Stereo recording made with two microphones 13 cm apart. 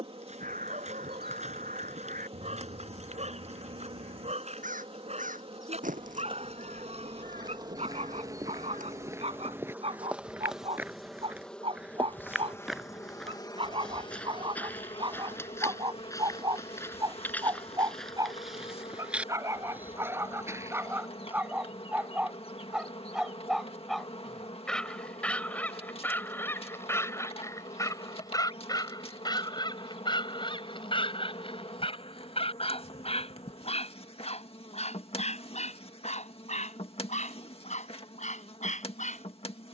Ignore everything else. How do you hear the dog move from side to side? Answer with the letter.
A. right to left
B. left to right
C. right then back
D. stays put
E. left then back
A.